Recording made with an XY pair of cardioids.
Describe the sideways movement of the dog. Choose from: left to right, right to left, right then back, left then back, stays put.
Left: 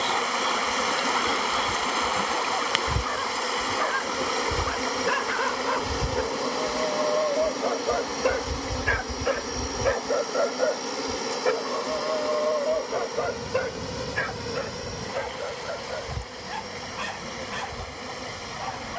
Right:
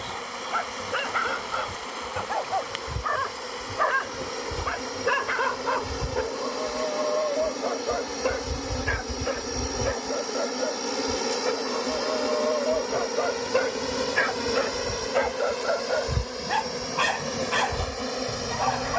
left then back.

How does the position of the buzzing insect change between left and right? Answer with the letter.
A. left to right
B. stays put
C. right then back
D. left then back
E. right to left
A.